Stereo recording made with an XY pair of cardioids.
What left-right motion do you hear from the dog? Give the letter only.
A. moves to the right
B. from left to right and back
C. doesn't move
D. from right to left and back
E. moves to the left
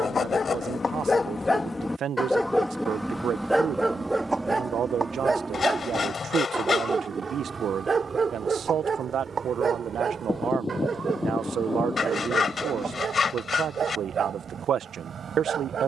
A.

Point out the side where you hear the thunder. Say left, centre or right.
left.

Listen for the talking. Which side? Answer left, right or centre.
right.